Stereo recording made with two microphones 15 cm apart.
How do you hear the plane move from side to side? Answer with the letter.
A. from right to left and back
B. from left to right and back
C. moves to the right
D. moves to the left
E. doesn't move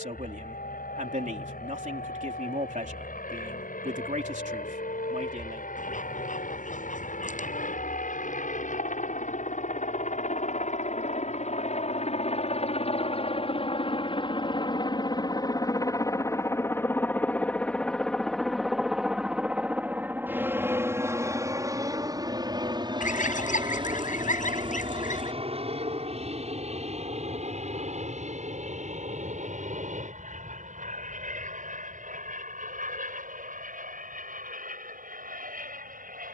C.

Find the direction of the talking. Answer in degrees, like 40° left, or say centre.
60° right.